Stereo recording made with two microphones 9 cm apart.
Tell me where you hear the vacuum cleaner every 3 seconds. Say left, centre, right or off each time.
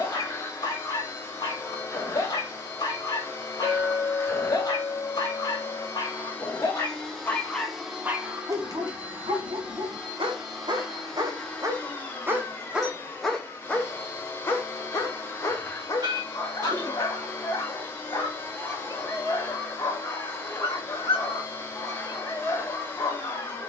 left, left, centre, centre, left, left, left, left.